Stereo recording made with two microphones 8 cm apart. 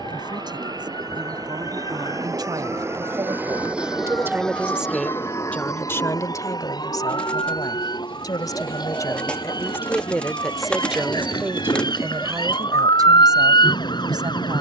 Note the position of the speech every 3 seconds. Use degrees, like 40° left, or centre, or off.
60° right, 10° right, 50° left, centre, 50° right.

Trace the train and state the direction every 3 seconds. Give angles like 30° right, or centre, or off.
50° right, 10° left, 60° left, 70° left, 80° left.